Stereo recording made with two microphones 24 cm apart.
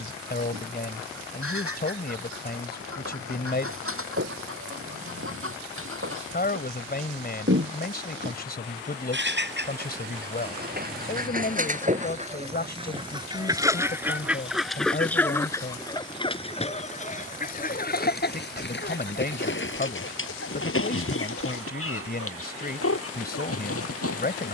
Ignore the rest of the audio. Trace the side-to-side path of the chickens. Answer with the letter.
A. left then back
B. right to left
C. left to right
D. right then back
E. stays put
B.